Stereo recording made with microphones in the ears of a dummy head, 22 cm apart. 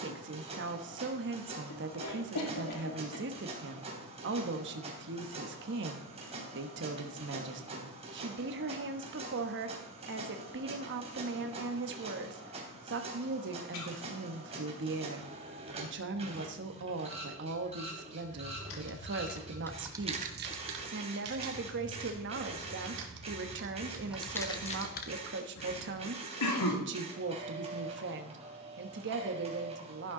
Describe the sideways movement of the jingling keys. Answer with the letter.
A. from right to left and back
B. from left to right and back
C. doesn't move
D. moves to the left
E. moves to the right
B.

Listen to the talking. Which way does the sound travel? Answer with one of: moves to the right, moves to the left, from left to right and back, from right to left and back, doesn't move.
doesn't move.